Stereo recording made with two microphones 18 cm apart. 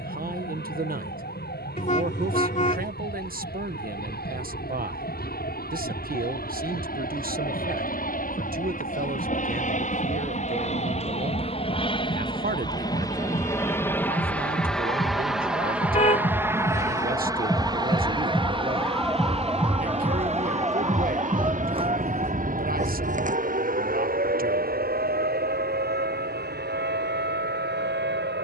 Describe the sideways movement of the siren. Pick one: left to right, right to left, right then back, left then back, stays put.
left to right.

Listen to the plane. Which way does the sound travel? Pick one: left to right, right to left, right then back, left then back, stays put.
left to right.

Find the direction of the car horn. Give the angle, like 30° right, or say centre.
40° left.